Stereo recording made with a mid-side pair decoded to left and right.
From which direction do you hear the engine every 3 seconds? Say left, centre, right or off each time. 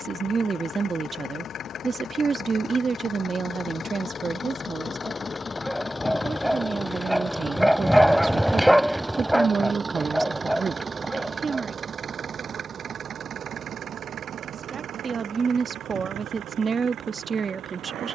left, left, centre, right, right, right.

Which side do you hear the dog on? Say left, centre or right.
centre.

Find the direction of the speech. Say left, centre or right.
right.